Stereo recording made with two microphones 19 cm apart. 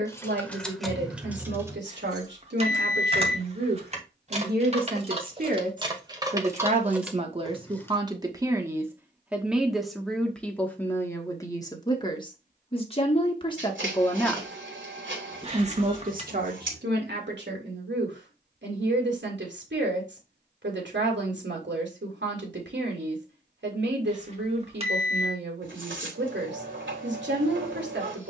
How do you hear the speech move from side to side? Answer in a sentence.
You can hear the speech go left and come back.